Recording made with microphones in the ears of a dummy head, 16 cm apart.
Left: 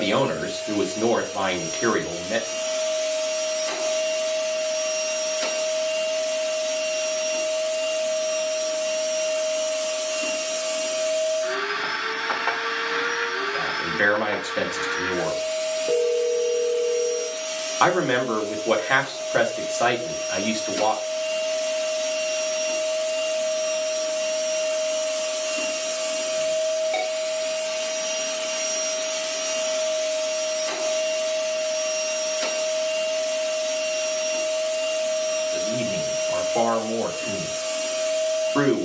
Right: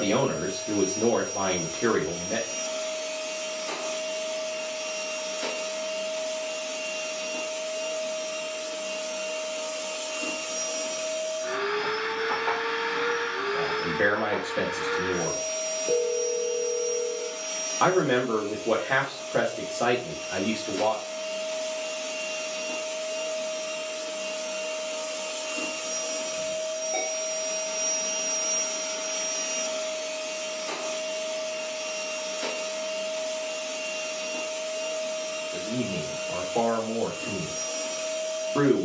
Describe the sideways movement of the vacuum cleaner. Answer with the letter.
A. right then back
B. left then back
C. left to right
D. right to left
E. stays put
E.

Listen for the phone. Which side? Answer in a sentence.
You can hear the phone on the left.